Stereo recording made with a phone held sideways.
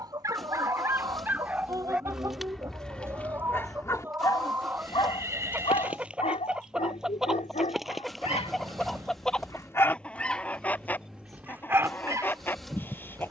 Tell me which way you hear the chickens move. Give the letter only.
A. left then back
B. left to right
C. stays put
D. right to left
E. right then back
D.